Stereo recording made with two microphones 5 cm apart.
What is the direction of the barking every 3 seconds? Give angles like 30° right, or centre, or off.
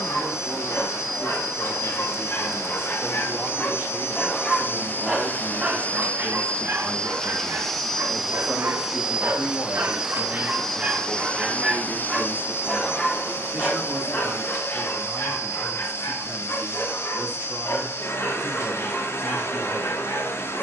60° left, centre, 60° right, 40° right, 30° left, 50° left, 60° left.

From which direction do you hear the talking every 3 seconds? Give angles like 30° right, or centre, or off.
50° right, 30° right, centre, 30° left, 30° right, 40° right, 40° right.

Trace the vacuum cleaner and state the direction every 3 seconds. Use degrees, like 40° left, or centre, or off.
60° left, 50° left, 10° left, centre, 50° left, 50° left, 50° left.